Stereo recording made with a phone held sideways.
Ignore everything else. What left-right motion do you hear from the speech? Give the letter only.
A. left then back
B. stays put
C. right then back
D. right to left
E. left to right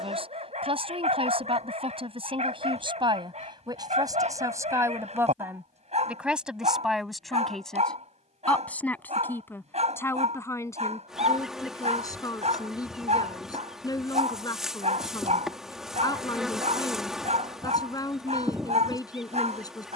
D.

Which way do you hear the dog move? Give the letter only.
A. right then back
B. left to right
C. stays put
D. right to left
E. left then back
C.